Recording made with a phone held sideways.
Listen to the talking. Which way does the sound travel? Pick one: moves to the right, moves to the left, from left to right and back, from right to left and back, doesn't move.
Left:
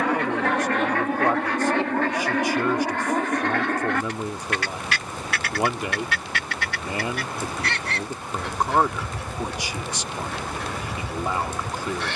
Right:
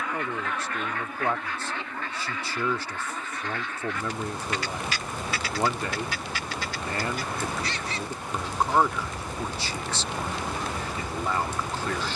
doesn't move.